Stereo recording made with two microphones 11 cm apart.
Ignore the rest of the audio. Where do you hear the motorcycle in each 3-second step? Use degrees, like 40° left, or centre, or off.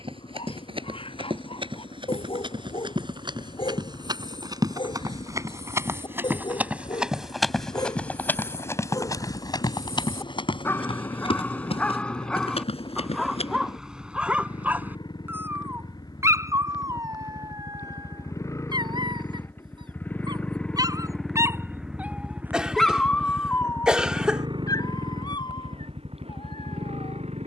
60° left, 60° left, 50° left, 50° left, 50° left, 40° left, 20° left, 20° right, 60° right.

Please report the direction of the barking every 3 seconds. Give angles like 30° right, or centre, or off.
60° left, 50° left, 40° left, 20° left, centre, 30° right, 40° right, centre, 50° left.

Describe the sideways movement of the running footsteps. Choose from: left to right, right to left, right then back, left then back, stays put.
right to left.